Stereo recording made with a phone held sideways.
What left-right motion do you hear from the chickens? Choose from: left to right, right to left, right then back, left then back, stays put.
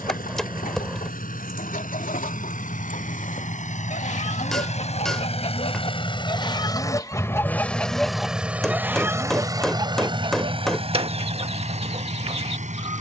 left to right.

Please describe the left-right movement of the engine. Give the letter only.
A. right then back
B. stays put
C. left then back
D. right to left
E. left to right
E.